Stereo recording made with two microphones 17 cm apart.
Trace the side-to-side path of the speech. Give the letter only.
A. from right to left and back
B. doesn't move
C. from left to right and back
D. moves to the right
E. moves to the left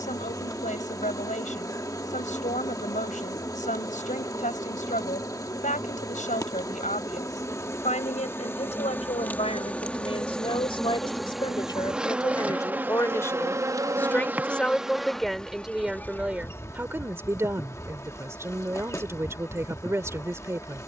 D.